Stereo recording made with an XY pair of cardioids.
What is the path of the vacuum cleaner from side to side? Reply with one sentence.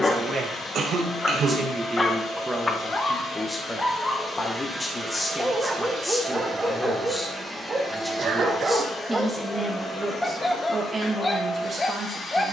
In this clip you hear the vacuum cleaner move from left to right and back again.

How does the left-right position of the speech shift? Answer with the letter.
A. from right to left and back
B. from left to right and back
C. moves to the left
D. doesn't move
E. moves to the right
A.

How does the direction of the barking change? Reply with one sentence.
In this clip you hear the barking move from left to right and back again.